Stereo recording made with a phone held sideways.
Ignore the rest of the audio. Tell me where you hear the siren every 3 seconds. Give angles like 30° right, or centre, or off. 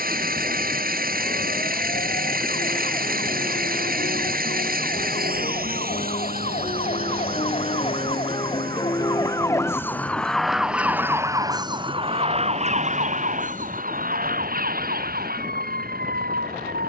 60° left, 60° left, 40° left, centre, 60° right, 80° right.